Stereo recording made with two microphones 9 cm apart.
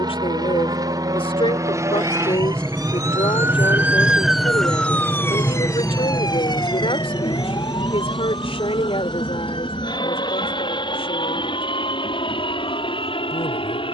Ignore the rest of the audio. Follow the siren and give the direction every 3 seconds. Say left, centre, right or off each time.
right, centre, left, left, left.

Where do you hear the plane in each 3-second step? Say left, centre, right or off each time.
right, centre, left, left, left.